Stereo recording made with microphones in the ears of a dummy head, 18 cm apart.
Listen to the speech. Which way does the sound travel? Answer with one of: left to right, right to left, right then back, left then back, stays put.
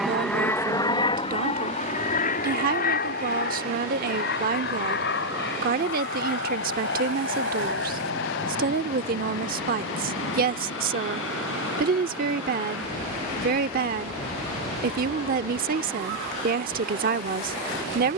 stays put.